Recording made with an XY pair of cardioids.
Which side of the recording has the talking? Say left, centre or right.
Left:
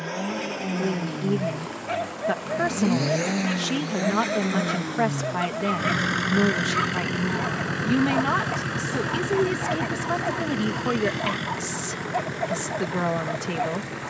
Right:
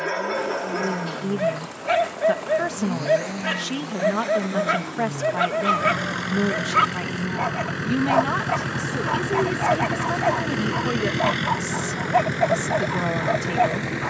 centre.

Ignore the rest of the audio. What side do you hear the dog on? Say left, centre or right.
right.